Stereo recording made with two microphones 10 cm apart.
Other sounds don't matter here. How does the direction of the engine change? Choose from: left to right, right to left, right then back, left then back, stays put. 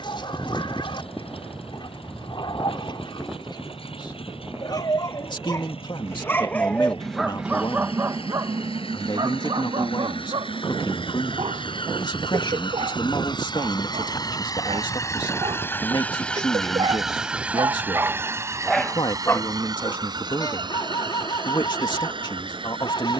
left to right.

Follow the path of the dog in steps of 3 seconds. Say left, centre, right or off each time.
left, left, centre, right, right, right, left, left.